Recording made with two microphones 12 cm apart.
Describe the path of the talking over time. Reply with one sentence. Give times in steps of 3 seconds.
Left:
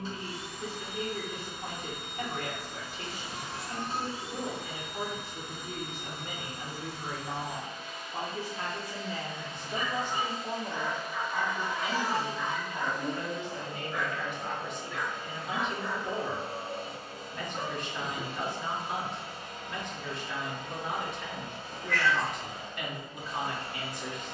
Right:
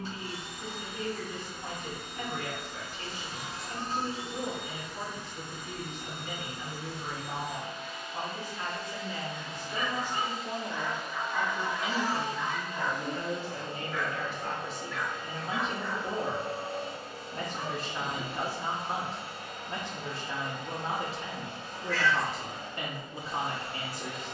In this clip you hear the talking on the left from 0 s, in the centre from 9 s and on the right from 12 s.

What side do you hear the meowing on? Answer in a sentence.
In this clip you hear the meowing on the left.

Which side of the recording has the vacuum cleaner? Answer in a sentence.
In this clip you hear the vacuum cleaner on the right.